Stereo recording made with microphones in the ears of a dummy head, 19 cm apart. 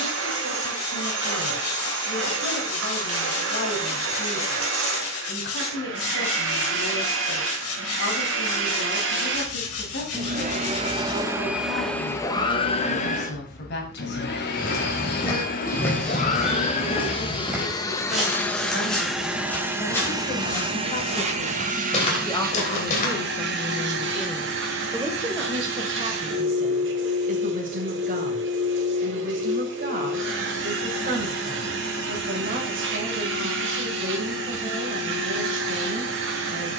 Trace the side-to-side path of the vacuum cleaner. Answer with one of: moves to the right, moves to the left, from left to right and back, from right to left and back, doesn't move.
from right to left and back.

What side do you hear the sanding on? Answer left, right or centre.
left.